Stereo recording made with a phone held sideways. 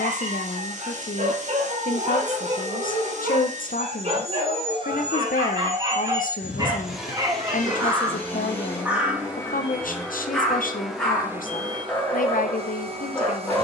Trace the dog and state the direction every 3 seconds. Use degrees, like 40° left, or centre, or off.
60° right, 40° right, 20° right, centre, 10° left.